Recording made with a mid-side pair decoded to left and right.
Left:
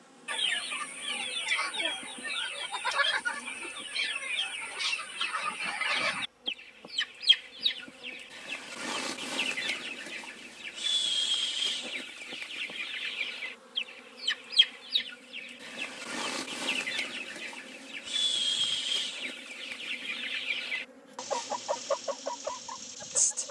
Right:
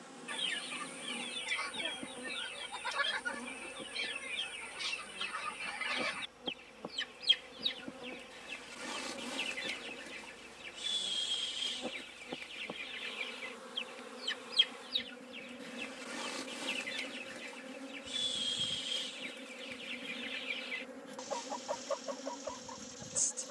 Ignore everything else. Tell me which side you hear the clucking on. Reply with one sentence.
You can hear the clucking on the left.